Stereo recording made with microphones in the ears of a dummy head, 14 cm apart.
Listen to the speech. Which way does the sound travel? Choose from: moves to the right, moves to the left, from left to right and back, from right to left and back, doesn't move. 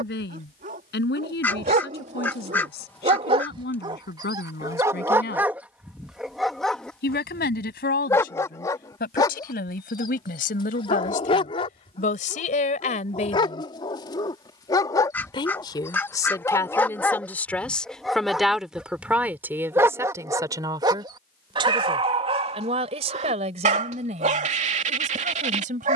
moves to the right.